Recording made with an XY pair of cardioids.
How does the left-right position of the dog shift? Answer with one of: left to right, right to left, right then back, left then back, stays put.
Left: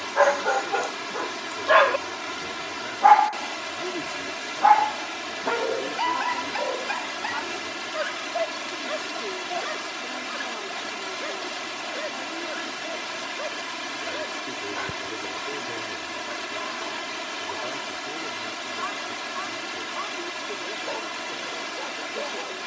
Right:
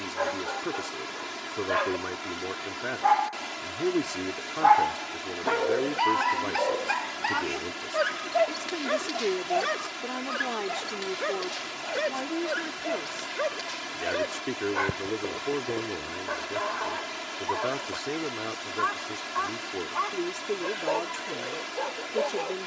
left to right.